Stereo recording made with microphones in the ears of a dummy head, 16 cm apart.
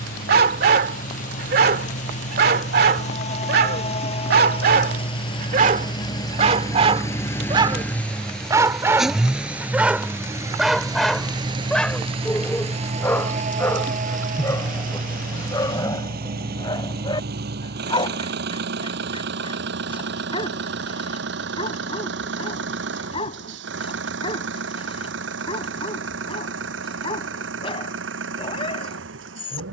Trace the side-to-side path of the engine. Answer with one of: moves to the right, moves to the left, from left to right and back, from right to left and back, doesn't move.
moves to the right.